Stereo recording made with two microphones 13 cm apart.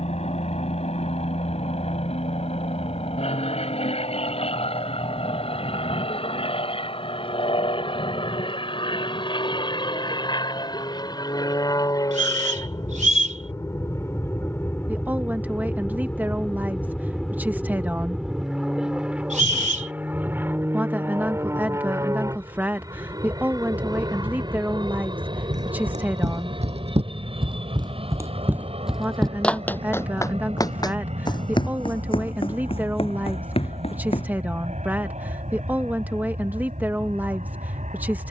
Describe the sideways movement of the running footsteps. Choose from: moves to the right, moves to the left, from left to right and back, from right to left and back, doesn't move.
moves to the left.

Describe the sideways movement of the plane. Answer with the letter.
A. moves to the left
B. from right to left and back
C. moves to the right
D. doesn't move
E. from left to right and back
C.